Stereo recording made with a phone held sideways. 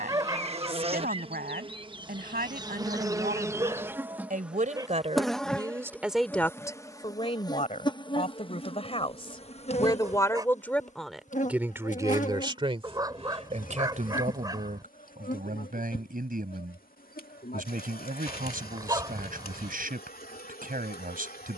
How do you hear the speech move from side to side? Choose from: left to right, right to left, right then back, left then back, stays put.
left then back.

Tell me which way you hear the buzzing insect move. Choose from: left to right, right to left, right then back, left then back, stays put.
right to left.